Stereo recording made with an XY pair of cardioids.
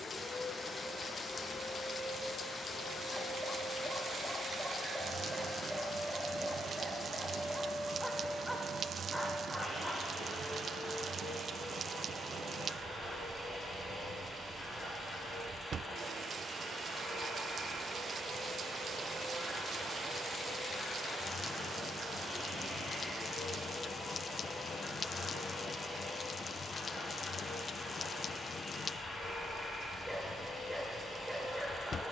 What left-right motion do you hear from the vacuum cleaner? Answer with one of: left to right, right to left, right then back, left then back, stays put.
stays put.